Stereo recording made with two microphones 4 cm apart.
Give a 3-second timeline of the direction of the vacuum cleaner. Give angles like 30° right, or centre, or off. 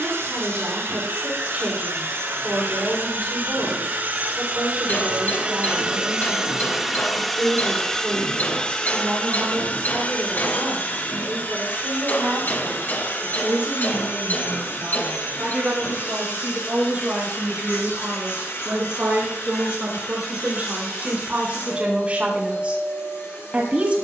70° right, 40° right, centre, 40° left, 60° left, 60° left, 70° left, 70° left.